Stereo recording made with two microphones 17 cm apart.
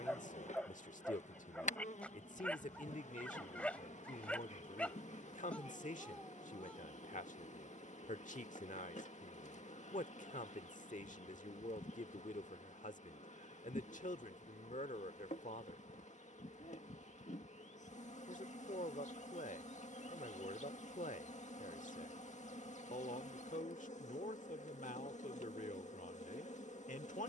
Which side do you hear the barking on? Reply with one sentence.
In this clip you hear the barking in the centre.